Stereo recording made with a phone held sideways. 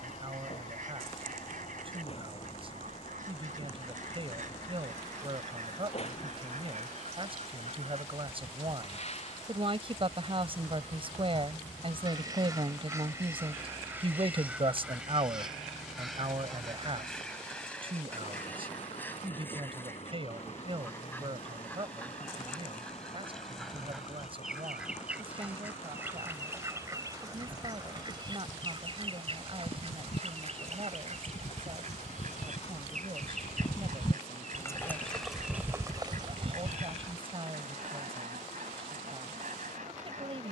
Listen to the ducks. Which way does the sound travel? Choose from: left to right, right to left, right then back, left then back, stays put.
left then back.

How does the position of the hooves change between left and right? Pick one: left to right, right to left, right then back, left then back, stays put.
left to right.